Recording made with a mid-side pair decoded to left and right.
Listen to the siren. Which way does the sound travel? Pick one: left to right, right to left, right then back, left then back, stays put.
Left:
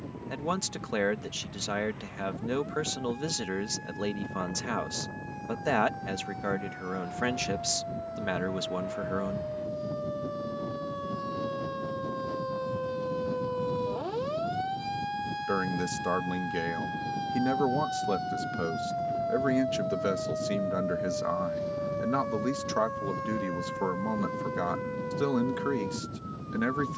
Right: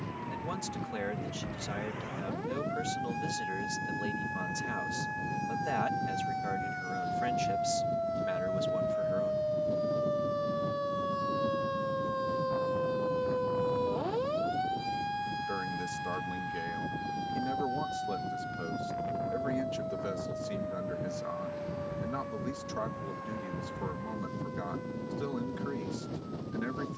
right to left.